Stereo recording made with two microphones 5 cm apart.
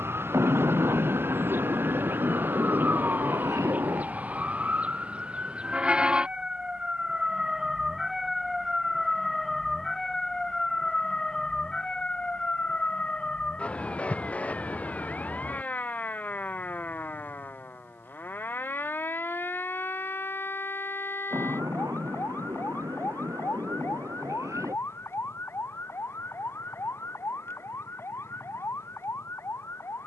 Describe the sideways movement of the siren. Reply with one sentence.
In this clip you hear the siren go from the right side to the left.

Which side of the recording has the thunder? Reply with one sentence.
In this clip you hear the thunder on the right.